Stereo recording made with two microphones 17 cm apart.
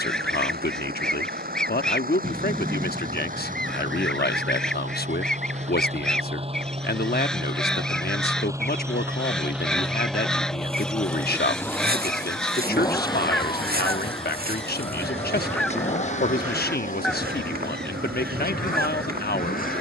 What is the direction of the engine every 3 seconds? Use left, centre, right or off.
right, right, right, centre, left, left, left.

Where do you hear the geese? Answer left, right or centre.
centre.